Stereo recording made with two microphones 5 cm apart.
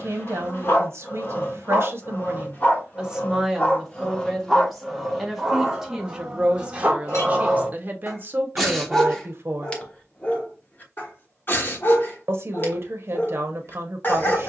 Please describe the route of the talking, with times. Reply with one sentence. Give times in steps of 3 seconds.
You can hear the talking on the right from 0 s, in the centre from 3 s and on the right from 6 s.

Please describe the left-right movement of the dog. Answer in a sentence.
In this clip you hear the dog move from left to right and back again.